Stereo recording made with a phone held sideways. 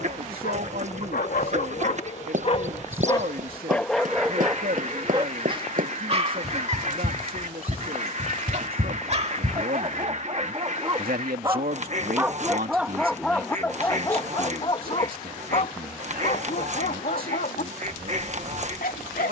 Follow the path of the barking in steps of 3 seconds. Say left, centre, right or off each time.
left, centre, right, right, centre, left, left.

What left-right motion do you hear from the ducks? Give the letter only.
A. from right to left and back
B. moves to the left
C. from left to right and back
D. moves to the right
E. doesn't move
E.